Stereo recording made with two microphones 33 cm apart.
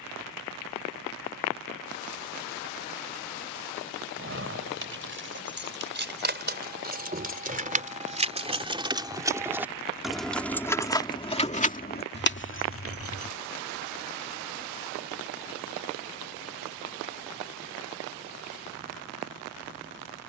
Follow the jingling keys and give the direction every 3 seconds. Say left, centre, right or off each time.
off, right, right, centre, left, off, off.